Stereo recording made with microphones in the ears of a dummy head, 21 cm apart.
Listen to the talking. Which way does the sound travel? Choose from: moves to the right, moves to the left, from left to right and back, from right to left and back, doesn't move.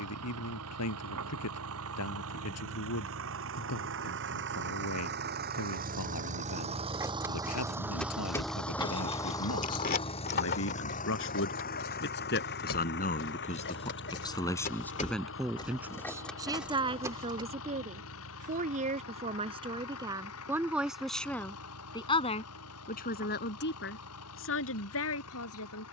from left to right and back.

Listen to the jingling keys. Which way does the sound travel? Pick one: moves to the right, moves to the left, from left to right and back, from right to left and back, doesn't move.
from right to left and back.